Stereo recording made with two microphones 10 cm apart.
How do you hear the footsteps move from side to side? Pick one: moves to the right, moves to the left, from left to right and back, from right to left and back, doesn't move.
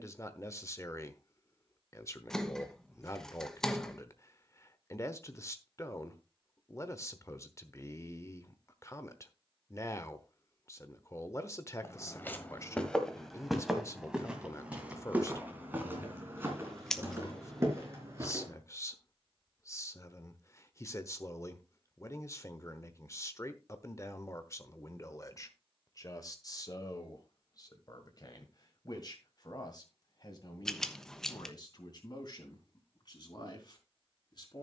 moves to the right.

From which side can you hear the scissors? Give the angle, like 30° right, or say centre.
10° left.